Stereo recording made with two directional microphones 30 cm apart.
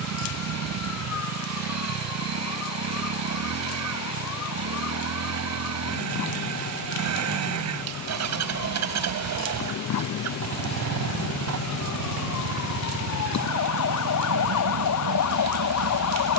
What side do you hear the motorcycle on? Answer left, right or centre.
right.